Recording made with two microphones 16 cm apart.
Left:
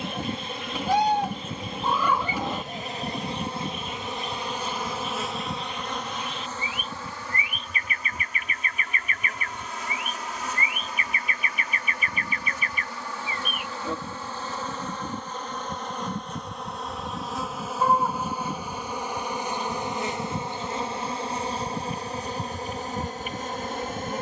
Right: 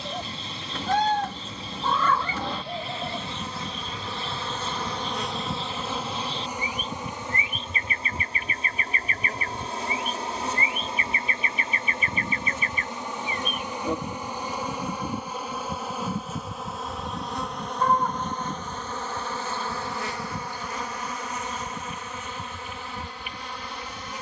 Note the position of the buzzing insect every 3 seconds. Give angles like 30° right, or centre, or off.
50° left, 10° left, 20° right, 30° right, 20° right, centre, 20° left, 40° left.